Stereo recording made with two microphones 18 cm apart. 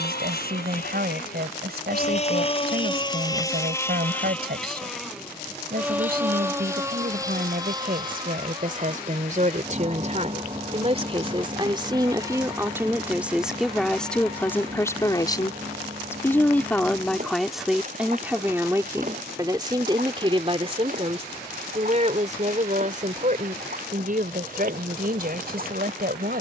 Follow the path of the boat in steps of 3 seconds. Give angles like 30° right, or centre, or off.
40° left, 10° left, 20° right, 30° right, 40° right, 40° right, 50° right, 50° right, 50° right.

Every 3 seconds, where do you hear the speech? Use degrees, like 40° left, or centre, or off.
60° right, 60° right, 50° right, 40° right, centre, 10° left, 20° right, 40° right, 50° right.